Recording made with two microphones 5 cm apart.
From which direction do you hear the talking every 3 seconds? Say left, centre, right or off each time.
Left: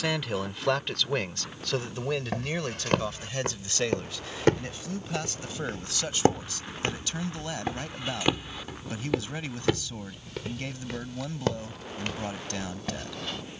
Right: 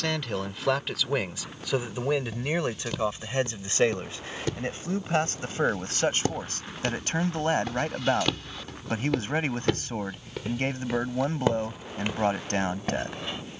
centre, right, right, right, right.